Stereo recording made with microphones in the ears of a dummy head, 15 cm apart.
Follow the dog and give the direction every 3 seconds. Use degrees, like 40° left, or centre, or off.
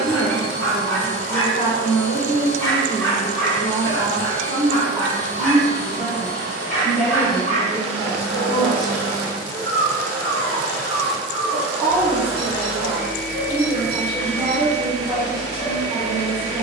20° left, 20° left, 40° left, 50° left, 50° left, 50° left.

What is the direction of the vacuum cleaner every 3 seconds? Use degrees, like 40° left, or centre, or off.
50° left, 50° left, 40° left, 10° left, 20° left, 40° left.